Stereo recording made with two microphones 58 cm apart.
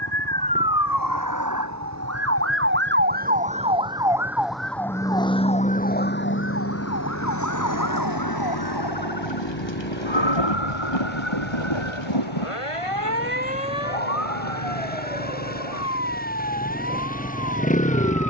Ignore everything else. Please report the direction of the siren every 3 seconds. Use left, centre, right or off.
right, centre, left, left, left, left.